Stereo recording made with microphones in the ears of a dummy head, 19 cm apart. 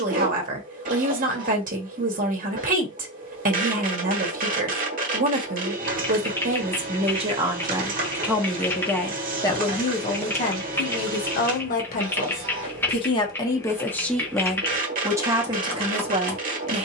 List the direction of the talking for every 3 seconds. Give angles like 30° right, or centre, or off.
40° right, 40° right, 20° right, 30° left, 20° left, 20° right.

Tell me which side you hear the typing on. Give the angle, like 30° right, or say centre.
10° left.